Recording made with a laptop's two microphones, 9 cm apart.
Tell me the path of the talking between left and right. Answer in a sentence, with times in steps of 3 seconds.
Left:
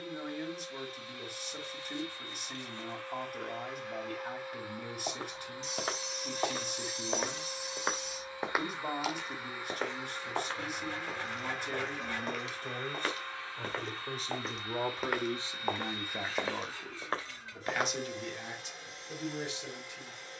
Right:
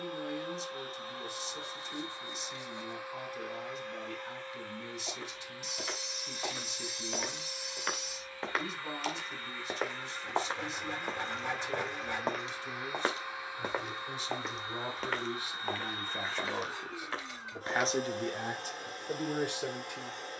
In this clip you hear the talking on the left from 0 s, in the centre from 15 s and on the right from 18 s.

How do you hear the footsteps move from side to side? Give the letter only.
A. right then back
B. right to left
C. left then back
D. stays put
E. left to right
A.